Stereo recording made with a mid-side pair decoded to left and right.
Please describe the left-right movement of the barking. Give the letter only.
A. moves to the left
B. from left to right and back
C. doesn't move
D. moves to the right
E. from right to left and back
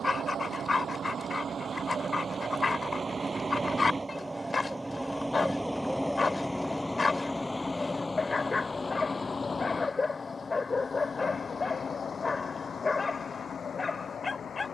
C.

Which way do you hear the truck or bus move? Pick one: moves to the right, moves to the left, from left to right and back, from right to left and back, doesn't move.
moves to the left.